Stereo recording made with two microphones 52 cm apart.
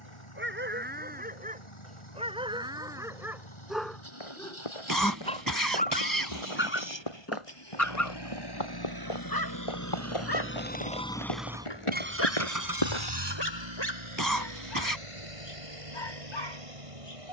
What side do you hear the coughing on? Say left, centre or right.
right.